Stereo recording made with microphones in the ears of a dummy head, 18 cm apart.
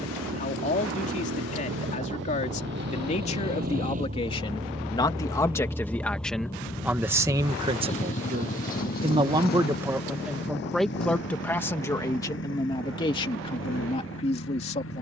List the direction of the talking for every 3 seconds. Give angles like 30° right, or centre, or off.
40° left, 20° left, 20° right, centre, 30° left.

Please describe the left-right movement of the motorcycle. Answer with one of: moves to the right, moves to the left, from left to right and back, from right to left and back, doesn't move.
moves to the left.